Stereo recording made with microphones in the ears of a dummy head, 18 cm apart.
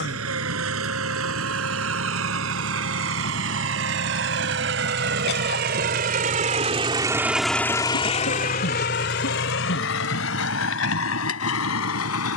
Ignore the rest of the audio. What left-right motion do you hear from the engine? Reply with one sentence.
In this clip you hear the engine travel towards the left.